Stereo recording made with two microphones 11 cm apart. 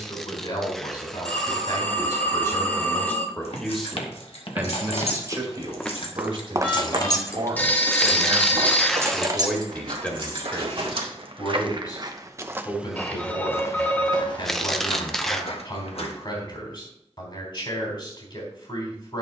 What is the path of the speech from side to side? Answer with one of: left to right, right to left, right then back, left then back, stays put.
right then back.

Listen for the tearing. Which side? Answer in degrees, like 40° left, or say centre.
centre.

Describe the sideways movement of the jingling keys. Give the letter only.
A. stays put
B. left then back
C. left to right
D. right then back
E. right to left
C.